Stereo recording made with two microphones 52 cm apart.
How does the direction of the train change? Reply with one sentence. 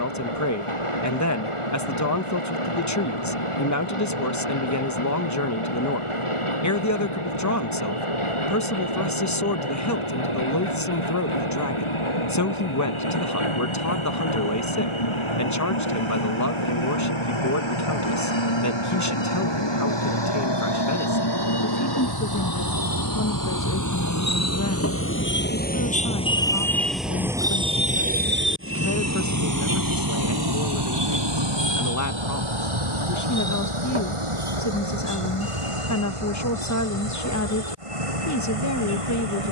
You can hear the train go from the left side to the right.